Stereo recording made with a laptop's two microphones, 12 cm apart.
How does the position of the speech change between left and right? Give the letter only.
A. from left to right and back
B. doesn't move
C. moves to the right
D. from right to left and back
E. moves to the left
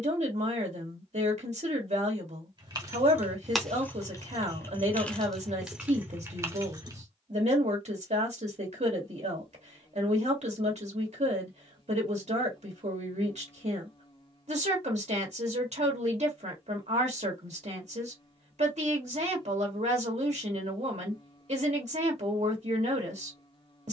B.